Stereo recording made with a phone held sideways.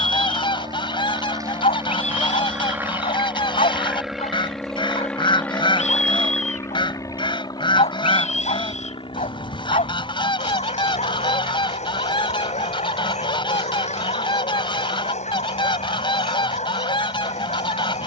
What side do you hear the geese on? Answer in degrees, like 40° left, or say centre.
40° left.